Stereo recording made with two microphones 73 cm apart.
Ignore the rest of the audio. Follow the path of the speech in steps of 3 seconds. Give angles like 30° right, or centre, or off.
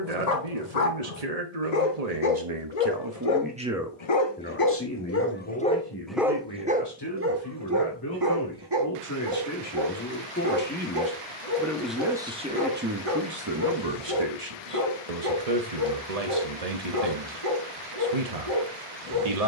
60° right, 10° left, 30° left, 20° left, 30° right, 60° right, 60° right.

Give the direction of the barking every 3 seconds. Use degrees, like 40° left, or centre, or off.
70° left, 30° left, 20° right, 40° right, 50° right, 50° right, 50° right.